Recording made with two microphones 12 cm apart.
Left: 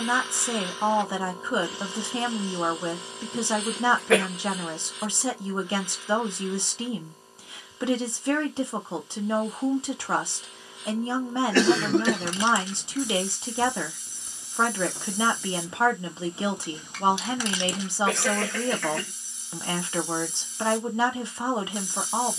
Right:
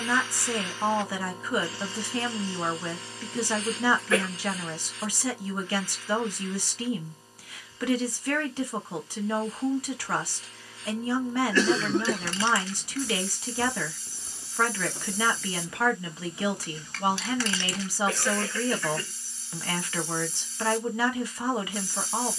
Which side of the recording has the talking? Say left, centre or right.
left.